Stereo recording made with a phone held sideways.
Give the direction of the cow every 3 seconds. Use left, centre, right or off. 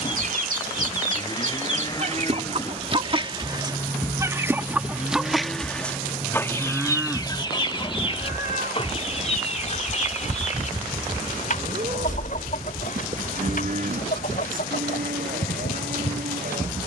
left, centre, centre, right, right, right.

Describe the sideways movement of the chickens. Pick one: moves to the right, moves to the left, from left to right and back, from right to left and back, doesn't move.
moves to the left.